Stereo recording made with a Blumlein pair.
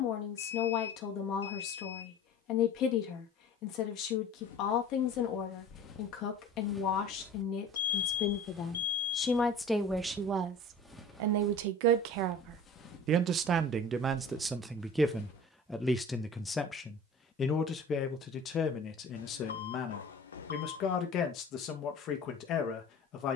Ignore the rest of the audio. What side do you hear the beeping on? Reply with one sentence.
In this clip you hear the beeping on the left.